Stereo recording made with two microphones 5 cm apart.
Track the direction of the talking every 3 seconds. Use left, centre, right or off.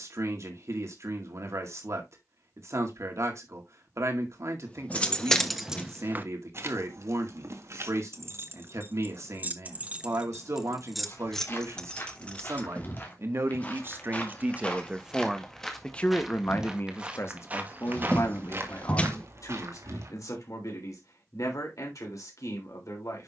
right, right, right, right, right, left, left, left.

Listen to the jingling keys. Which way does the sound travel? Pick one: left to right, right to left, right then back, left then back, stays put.
right then back.